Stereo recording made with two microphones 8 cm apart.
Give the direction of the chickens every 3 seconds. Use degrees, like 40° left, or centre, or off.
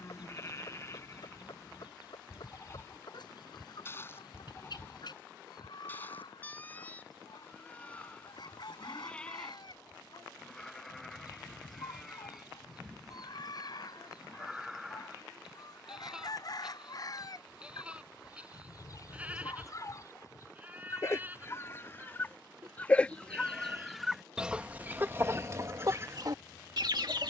60° left, 60° left, 60° left, 60° left, 60° left, 50° left, 50° left, 20° left, 30° right.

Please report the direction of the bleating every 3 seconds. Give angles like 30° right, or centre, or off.
30° left, 30° left, 20° left, 10° left, centre, 10° right, 20° right, 20° right, 30° right.